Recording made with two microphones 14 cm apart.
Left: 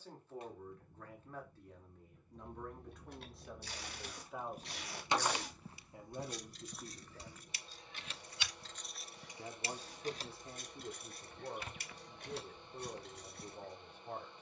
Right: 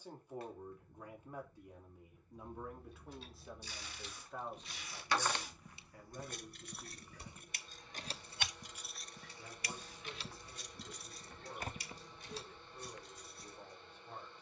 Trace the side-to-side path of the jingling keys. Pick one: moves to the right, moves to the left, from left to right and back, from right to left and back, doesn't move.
from left to right and back.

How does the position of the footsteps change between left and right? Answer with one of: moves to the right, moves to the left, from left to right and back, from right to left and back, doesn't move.
from left to right and back.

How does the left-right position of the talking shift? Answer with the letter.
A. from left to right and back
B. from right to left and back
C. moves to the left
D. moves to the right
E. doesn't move
C.